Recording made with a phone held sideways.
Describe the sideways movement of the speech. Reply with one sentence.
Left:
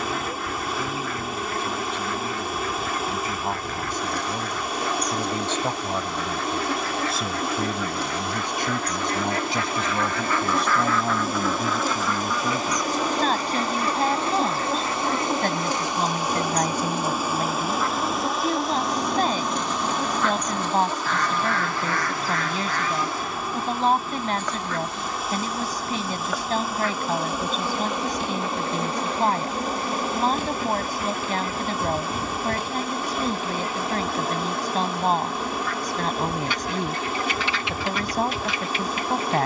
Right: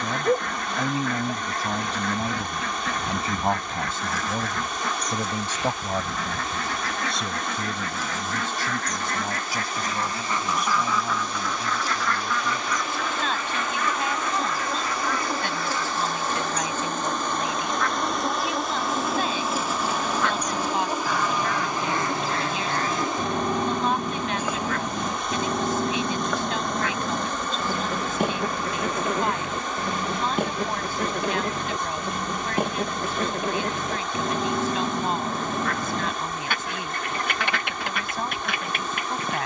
In this clip you hear the speech go from the right side to the left.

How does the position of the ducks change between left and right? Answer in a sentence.
In this clip you hear the ducks go left and come back.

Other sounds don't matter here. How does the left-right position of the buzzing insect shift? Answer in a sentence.
You can hear the buzzing insect go right and come back.